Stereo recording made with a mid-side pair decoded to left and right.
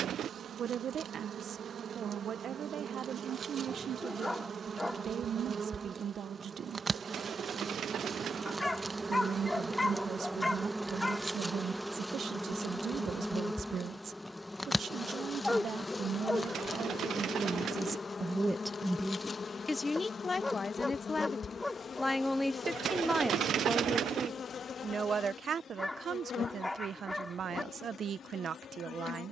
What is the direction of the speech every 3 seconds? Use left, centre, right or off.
right, right, right, right, right, right, centre, centre, right, right.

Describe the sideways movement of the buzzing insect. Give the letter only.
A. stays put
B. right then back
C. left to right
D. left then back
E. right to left
E.